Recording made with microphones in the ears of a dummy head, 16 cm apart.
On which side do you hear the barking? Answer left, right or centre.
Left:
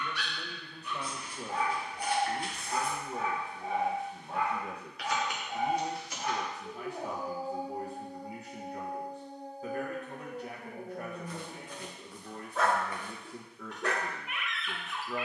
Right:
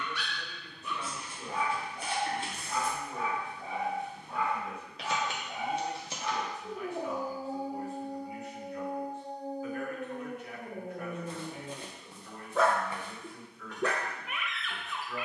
right.